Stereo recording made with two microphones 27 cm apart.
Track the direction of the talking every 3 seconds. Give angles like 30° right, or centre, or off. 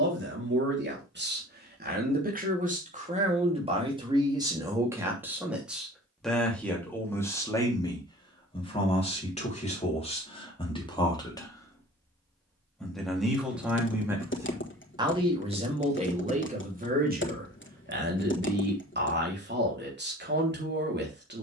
40° right, 10° right, 10° left, 20° left, centre, 30° right, 40° right.